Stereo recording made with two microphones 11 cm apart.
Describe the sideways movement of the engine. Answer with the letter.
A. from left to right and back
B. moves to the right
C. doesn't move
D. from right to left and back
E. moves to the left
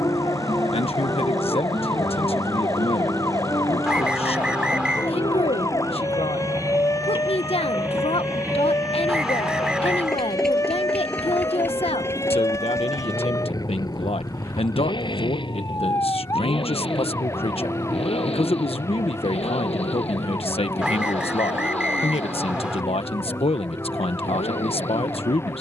E.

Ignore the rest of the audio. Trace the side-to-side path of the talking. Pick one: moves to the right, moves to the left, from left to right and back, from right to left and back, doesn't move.
doesn't move.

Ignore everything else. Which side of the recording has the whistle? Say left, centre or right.
centre.